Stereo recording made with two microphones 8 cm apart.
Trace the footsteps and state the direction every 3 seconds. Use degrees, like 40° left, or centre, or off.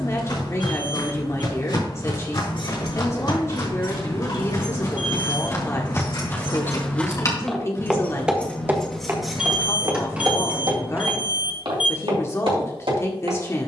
60° left, 40° left, 10° left, 50° right, 70° right.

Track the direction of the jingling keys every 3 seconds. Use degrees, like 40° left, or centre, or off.
80° left, 70° left, 30° left, 10° right, off.